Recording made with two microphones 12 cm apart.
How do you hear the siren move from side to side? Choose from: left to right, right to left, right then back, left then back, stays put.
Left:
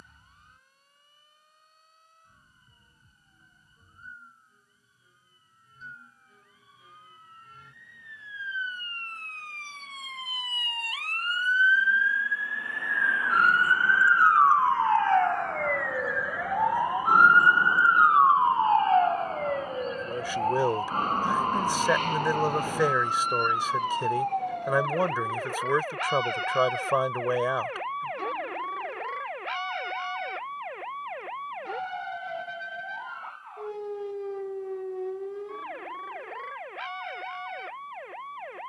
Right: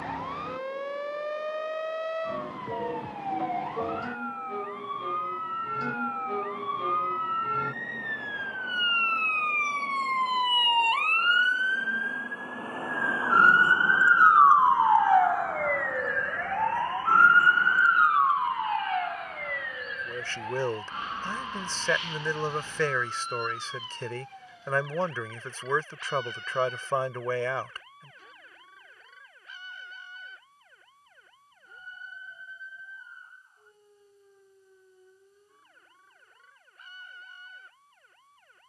right to left.